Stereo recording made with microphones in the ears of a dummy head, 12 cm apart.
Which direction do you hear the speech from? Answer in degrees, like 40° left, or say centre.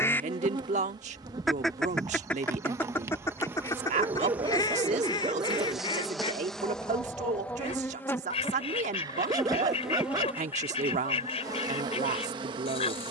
60° right.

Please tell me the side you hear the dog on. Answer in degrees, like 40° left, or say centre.
30° right.